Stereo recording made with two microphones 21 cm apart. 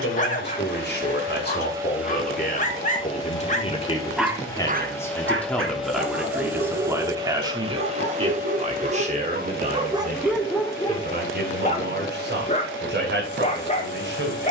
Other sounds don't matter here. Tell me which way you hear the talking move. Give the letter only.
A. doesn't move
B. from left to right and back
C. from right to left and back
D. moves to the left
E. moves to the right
E.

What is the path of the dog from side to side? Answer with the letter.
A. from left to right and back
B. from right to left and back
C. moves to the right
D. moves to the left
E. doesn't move
A.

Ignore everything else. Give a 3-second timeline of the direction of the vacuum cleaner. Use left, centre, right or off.
right, centre, right, right, right.